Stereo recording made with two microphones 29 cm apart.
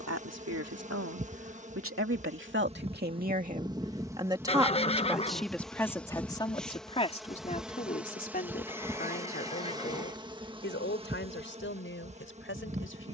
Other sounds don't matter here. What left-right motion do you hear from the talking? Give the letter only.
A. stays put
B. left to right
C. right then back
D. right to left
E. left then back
D.